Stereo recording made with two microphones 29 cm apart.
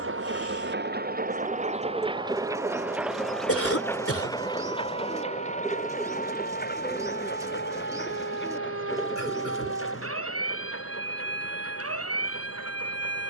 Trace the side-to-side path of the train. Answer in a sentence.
In this clip you hear the train go from the right side to the left.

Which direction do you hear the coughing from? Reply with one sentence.
You can hear the coughing on the left.